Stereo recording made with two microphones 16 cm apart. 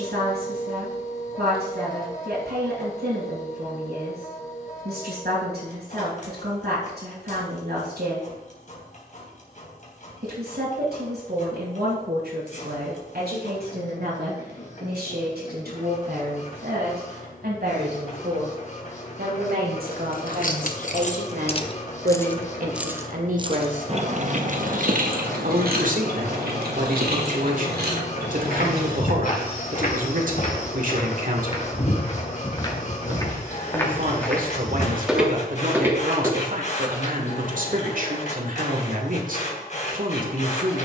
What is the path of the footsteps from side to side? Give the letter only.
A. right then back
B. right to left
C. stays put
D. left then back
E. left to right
E.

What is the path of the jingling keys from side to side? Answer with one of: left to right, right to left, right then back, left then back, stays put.
left to right.